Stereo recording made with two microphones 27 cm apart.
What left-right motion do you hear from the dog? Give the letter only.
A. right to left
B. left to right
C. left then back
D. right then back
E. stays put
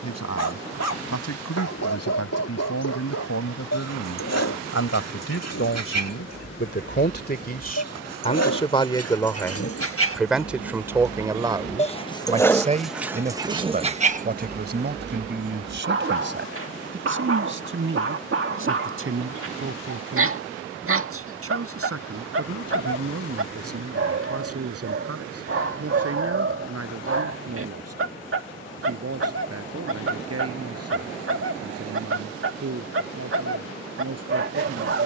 B.